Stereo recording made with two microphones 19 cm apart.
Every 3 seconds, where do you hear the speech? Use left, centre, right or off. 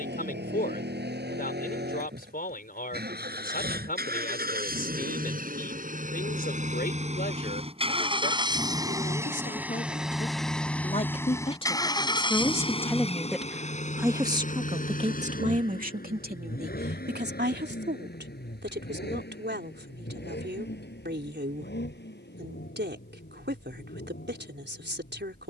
left, left, left, left, centre, right, right, right, right.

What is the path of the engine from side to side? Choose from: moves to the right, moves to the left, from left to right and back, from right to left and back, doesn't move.
moves to the left.